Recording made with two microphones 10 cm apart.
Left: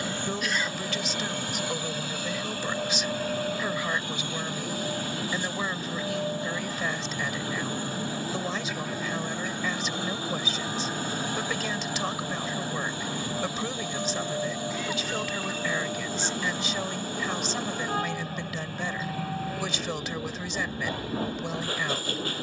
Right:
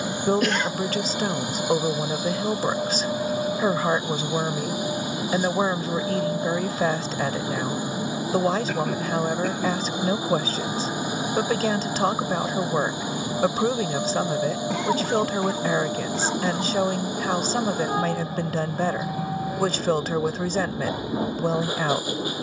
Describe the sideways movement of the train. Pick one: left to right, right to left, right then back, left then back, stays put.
stays put.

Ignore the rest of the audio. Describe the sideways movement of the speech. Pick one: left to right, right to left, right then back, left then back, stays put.
stays put.